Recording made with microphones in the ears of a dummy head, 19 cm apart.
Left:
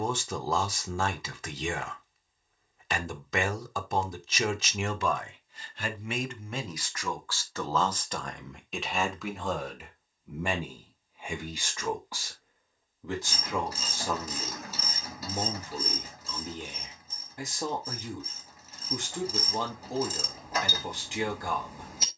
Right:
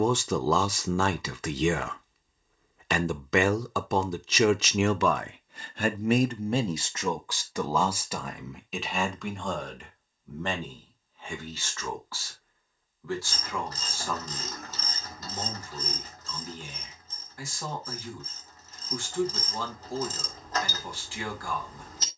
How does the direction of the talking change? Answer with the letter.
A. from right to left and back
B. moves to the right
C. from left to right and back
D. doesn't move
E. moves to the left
E.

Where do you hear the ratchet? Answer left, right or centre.
centre.